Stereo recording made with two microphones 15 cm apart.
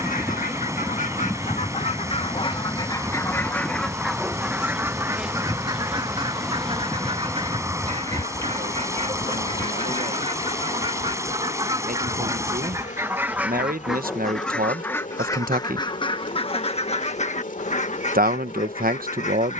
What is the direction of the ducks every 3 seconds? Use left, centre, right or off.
left, centre, right, right, centre, left, left.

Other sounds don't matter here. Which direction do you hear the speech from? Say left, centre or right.
right.